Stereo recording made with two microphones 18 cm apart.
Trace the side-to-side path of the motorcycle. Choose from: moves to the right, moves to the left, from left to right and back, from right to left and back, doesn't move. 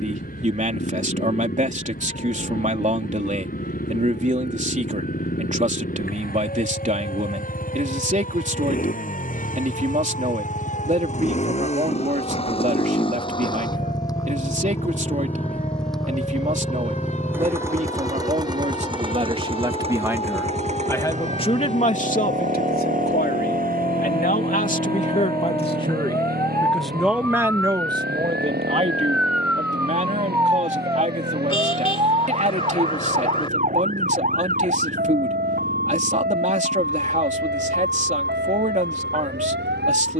moves to the right.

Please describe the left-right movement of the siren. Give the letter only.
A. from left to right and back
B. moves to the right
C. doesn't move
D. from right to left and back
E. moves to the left
B.